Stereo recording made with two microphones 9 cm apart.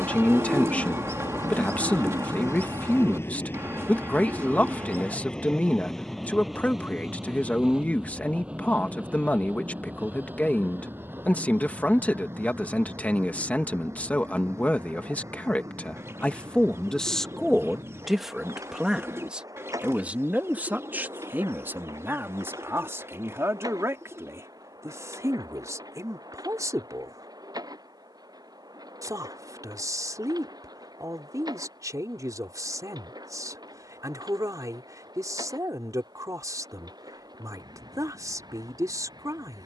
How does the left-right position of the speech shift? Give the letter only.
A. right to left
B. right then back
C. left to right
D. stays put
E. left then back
C.